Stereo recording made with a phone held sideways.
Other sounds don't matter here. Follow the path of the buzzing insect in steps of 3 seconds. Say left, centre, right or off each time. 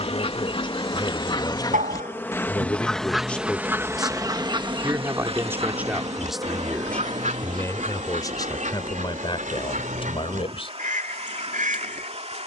left, centre, right, right.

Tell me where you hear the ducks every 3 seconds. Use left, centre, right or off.
left, right, right, right.